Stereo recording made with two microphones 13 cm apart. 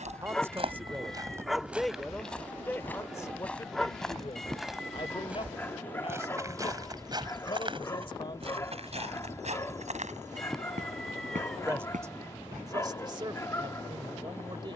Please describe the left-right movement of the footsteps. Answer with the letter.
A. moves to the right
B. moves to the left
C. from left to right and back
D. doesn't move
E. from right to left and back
E.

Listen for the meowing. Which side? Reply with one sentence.
In this clip you hear the meowing in the centre.